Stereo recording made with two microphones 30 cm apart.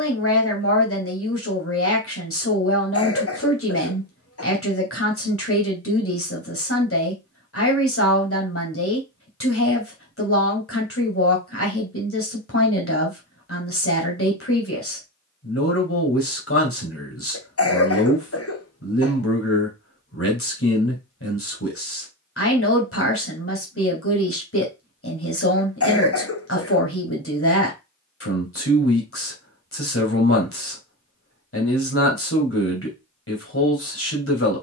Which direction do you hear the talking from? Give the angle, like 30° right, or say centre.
50° left.